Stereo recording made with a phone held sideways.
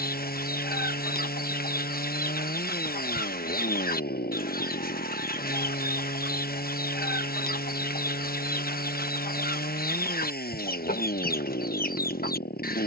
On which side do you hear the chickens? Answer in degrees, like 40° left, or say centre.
70° left.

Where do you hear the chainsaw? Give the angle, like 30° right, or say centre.
80° left.